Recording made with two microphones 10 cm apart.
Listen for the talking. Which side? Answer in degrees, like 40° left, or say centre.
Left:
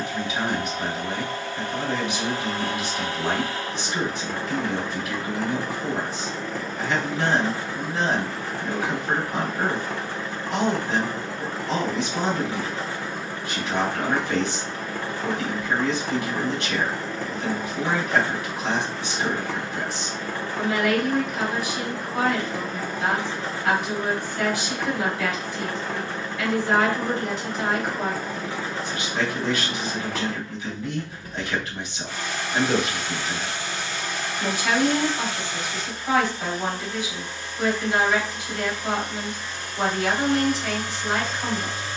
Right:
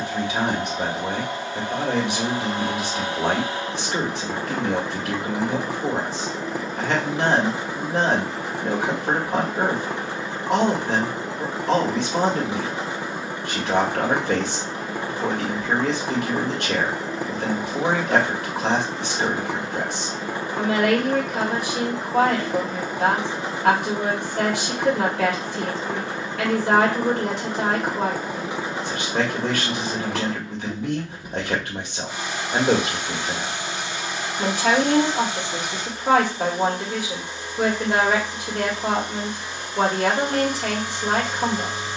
70° right.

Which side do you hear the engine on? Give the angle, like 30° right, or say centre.
20° right.